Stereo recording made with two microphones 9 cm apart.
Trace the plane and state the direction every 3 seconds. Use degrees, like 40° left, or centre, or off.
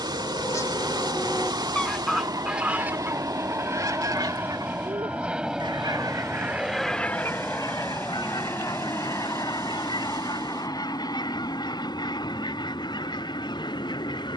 50° right, 20° right, 10° left, 40° left, 50° left.